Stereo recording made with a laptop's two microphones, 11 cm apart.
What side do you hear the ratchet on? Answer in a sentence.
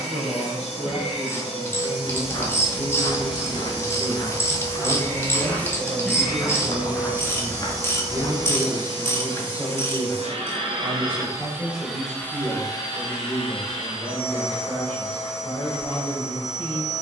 You can hear the ratchet on the left.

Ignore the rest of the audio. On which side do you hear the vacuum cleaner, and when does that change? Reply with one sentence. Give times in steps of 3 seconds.
You can hear the vacuum cleaner on the left from 0 s, on the right from 6 s and on the left from 12 s.